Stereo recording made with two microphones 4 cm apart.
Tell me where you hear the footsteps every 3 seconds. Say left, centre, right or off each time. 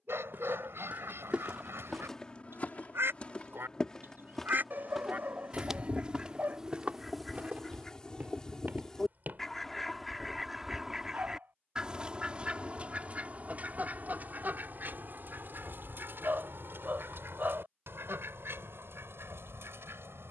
centre, centre, right, right, off, off, off.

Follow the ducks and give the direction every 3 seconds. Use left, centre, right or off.
right, right, centre, centre, right, right, right.